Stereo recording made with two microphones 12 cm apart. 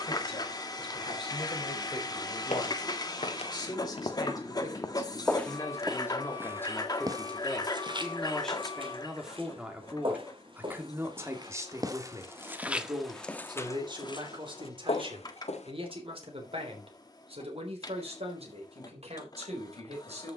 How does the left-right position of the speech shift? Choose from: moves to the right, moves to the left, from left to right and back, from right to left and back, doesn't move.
moves to the right.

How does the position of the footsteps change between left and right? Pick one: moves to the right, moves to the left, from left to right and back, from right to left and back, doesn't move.
from left to right and back.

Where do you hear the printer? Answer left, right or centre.
left.